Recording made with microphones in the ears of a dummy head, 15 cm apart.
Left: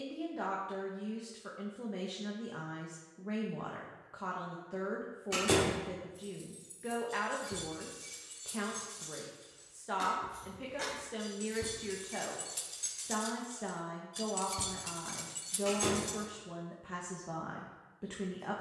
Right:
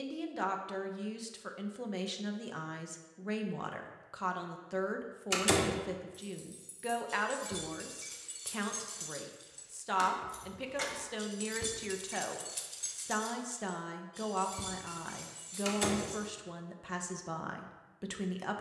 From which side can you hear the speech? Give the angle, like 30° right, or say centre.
80° right.